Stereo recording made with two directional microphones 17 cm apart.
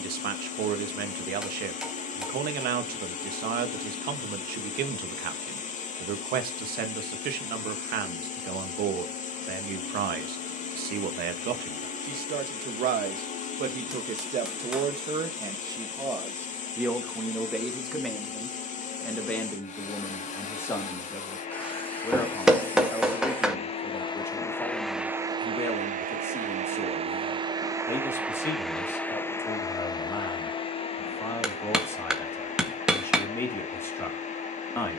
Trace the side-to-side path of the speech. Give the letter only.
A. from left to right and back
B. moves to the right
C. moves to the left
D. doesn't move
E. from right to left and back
C.